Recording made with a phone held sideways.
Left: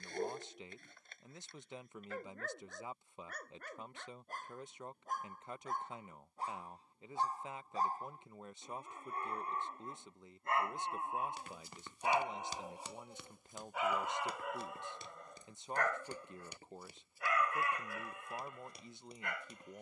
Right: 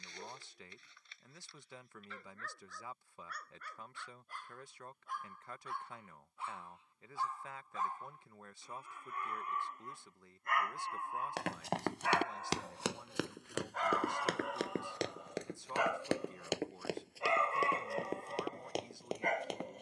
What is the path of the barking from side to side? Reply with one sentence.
You can hear the barking move from left to right.